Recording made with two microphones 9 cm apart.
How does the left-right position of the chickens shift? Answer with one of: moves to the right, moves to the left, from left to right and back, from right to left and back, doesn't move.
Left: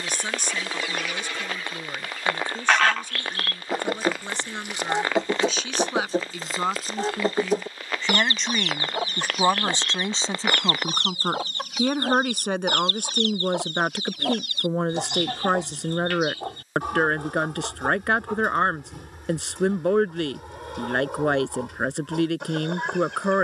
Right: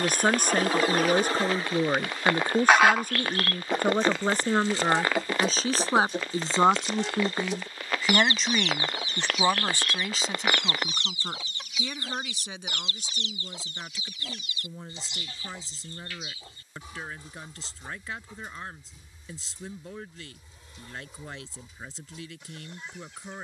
moves to the left.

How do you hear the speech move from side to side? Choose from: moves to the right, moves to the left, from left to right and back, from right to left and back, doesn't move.
moves to the left.